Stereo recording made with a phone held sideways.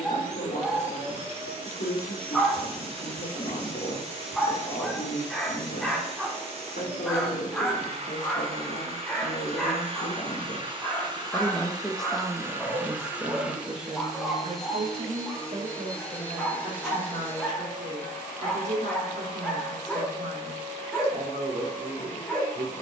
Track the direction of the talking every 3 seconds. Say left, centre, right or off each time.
left, left, left, left, right, right, right, right.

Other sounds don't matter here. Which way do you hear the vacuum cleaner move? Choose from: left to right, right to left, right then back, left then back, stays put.
right to left.